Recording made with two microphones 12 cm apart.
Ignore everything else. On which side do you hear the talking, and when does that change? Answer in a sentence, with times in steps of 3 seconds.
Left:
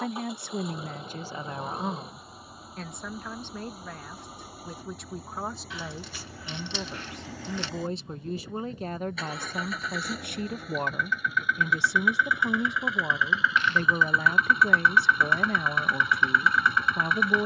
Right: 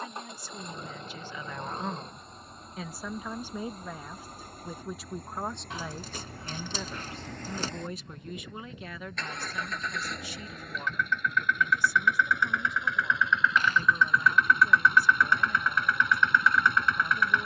In this clip you hear the talking on the left from 0 s, in the centre from 3 s and on the left from 6 s.